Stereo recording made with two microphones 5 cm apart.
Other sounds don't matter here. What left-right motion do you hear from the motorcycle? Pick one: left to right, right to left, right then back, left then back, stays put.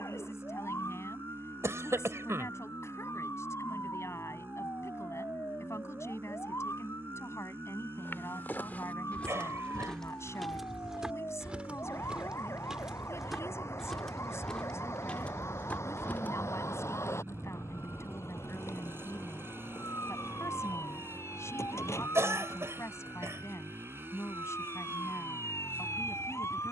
stays put.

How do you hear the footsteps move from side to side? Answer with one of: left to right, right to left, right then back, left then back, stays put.
right then back.